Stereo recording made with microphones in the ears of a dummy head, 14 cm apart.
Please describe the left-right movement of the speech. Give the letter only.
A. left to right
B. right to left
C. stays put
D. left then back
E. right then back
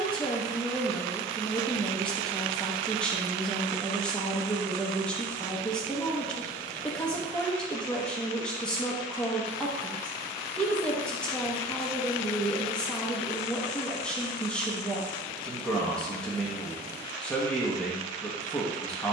C.